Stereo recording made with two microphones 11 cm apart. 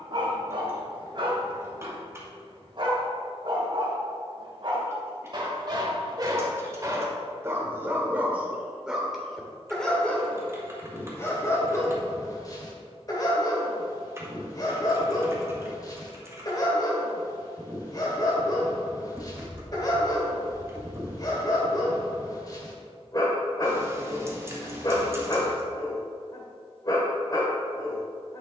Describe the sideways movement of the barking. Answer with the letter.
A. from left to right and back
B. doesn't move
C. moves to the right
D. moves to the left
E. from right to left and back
D.